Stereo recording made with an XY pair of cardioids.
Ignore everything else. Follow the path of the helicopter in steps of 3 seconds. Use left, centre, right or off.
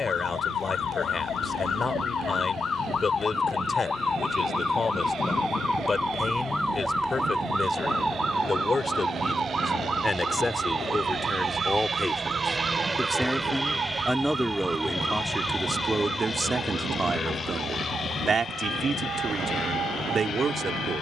right, right, right, right, centre, left, left.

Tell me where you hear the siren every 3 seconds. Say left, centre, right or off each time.
left, left, centre, right, right, right, right.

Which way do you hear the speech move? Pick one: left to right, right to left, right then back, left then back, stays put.
left to right.